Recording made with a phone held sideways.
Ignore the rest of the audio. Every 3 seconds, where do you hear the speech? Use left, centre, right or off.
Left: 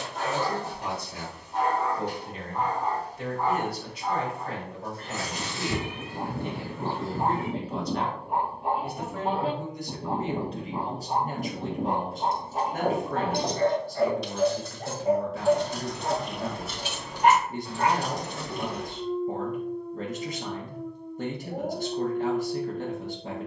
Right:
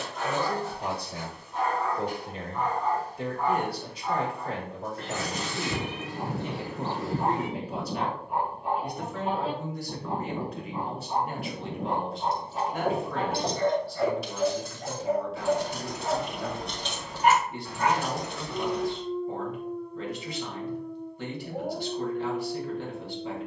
right, right, centre, left, left, left, left, left.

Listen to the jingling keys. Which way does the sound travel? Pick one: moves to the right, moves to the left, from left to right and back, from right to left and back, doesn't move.
from left to right and back.